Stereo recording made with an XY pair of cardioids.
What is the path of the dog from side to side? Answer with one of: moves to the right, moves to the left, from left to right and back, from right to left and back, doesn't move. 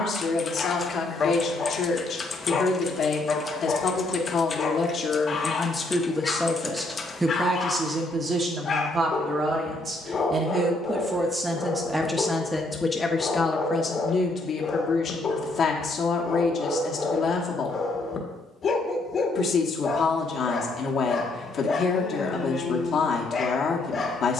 doesn't move.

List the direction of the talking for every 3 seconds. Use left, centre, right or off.
left, left, right, right, left, left, left, left.